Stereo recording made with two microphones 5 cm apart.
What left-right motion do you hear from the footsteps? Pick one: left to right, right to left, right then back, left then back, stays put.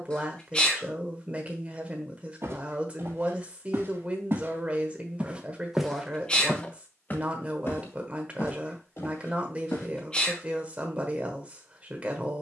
right to left.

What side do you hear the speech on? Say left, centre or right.
right.